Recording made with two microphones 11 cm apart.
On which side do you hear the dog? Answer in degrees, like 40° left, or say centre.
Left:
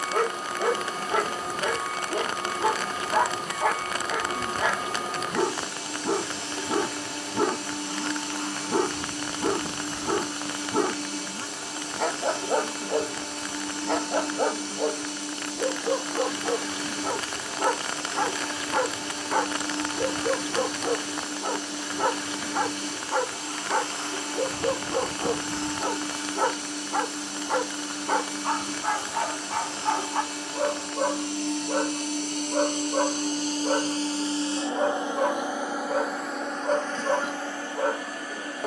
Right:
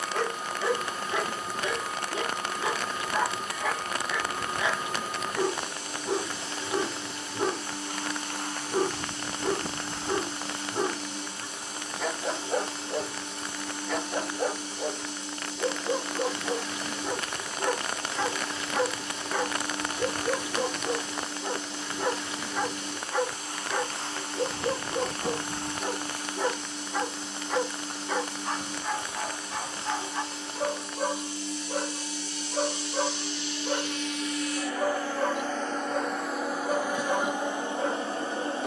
50° left.